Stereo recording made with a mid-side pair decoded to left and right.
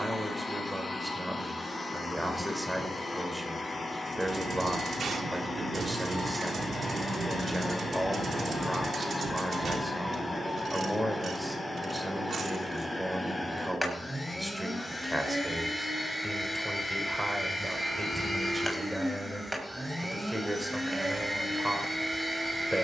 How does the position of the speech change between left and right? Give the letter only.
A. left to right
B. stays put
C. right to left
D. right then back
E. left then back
B.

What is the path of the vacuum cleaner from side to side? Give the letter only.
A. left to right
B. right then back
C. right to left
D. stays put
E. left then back
A.